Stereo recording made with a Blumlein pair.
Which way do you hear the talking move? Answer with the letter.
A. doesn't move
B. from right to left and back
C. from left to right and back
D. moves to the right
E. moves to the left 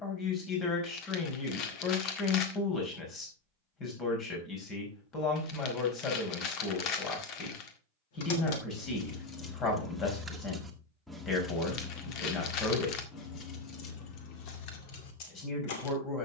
A.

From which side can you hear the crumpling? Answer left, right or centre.
left.